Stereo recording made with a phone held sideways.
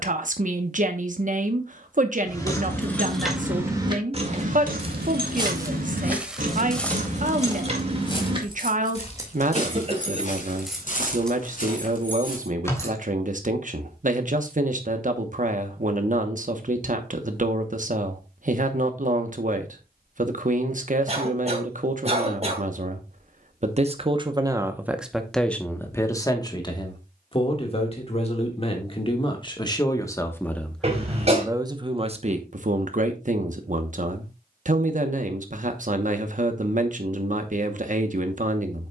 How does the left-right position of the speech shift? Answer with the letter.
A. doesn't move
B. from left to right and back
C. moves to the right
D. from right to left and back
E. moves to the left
D.